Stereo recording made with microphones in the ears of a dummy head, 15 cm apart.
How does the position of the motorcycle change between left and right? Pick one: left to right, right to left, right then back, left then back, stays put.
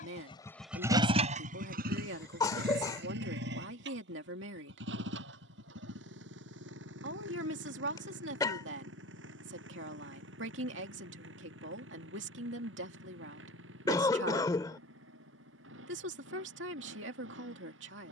left to right.